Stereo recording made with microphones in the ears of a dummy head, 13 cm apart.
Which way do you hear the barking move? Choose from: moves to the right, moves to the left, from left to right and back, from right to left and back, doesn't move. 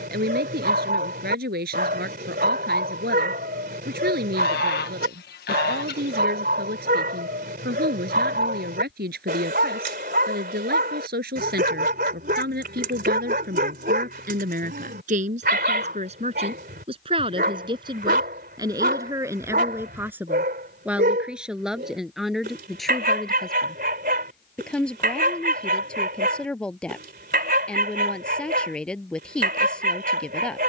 doesn't move.